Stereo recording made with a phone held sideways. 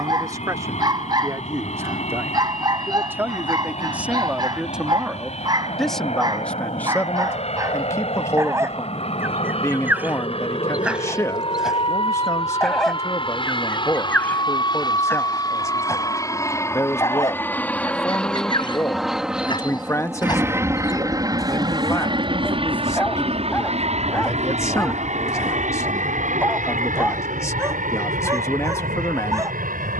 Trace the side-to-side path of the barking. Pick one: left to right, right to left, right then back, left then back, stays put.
left then back.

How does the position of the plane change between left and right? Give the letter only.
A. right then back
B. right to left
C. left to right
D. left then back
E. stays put
C.